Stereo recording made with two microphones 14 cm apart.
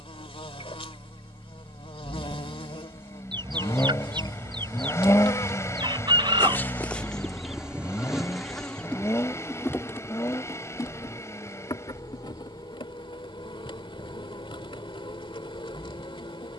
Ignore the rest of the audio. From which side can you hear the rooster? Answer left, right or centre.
right.